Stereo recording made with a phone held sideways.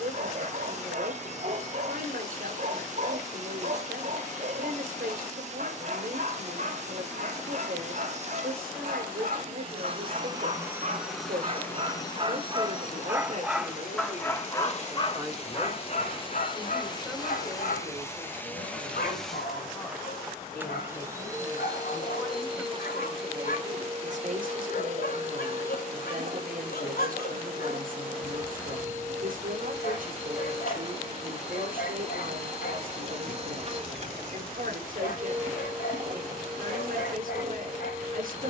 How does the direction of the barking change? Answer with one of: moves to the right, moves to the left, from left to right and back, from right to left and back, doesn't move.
moves to the left.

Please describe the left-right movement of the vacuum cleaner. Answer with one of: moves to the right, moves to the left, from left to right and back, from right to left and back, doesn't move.
from right to left and back.